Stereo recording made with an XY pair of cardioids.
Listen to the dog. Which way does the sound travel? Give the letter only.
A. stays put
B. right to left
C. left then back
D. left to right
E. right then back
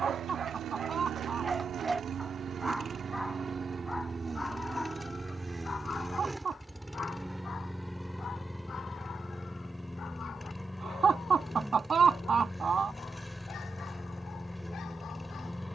B.